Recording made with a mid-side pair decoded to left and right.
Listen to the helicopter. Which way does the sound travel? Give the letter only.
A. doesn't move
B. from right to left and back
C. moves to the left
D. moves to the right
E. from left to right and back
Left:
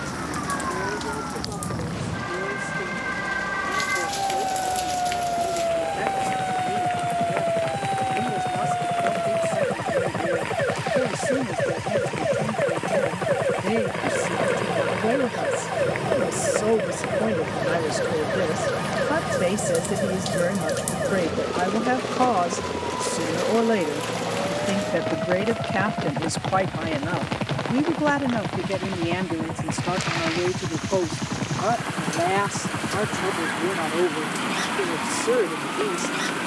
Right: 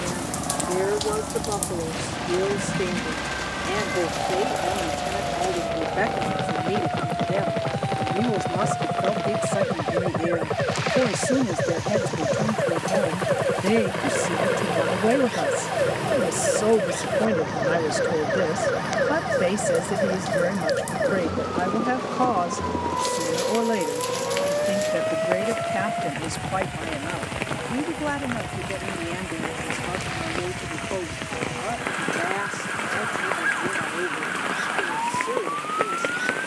C.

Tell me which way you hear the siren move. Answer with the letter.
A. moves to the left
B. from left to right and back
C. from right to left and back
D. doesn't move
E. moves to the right
E.